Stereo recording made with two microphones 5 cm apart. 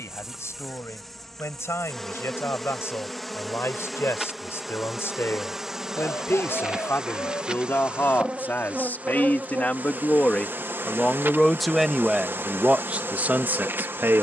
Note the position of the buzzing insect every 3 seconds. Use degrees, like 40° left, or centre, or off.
centre, centre, 20° right, 40° right, 50° right.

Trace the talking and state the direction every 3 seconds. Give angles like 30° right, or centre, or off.
60° left, 60° left, 50° left, 20° left, 30° right.